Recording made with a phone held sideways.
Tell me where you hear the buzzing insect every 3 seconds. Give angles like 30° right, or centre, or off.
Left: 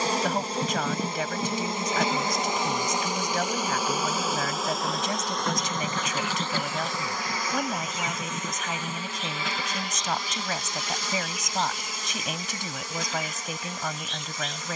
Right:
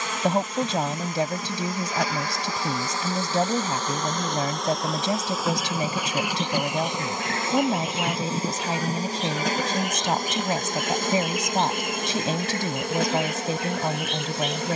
30° left, centre, 20° right, 50° right, 60° right.